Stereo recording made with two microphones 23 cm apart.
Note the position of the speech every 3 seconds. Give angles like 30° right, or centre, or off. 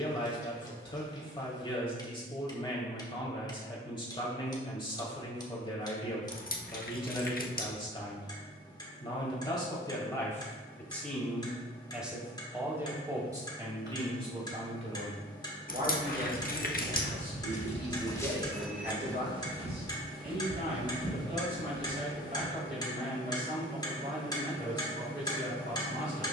20° left, 20° left, 20° left, 10° left, 20° right, 40° right, 50° right, 50° right, 50° right.